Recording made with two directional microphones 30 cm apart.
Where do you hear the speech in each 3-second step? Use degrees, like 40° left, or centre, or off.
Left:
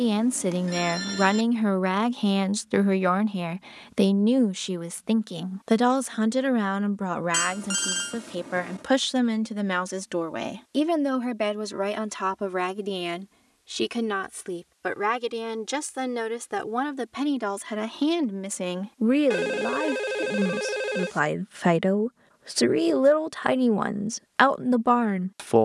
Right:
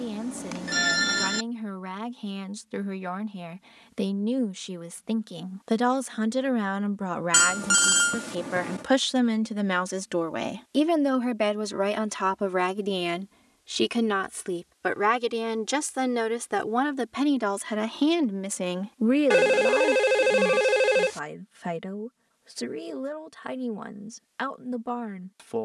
60° left, 30° left, 10° left, 10° right, 10° right, 10° right, 10° left, 60° left, 60° left.